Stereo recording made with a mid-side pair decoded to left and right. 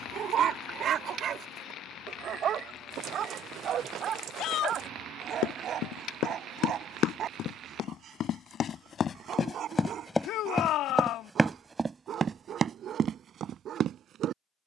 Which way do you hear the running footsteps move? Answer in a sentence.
In this clip you hear the running footsteps move to the right.